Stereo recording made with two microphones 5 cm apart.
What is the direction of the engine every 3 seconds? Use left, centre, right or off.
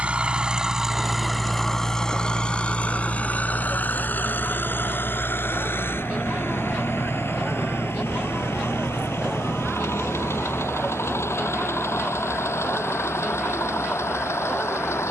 centre, left, left, left, left.